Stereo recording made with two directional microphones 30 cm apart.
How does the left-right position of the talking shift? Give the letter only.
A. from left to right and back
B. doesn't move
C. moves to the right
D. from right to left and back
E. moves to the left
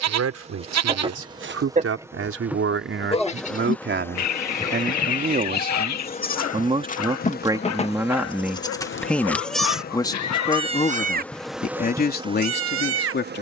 E.